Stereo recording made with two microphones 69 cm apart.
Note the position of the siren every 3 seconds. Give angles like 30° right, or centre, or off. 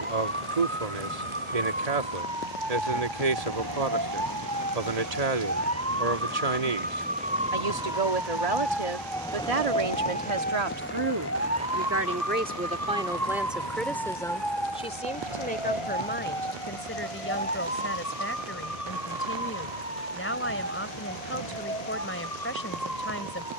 40° right, 30° right, 10° right, 10° left, 30° left, 40° left, 50° left, 60° left.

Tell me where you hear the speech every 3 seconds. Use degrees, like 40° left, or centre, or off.
60° right, 60° right, 60° right, 40° right, centre, 20° left, 20° left, 20° left.